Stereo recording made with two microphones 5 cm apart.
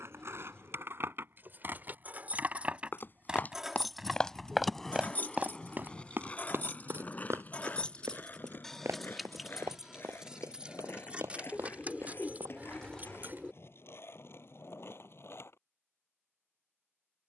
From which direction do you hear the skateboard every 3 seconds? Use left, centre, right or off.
right, centre, left, left, left, left.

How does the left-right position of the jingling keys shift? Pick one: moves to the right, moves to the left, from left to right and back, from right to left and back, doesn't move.
from right to left and back.